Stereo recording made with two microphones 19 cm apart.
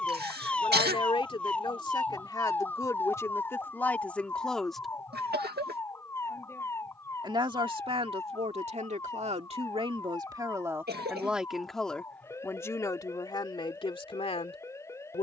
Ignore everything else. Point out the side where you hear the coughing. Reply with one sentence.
In this clip you hear the coughing on the right.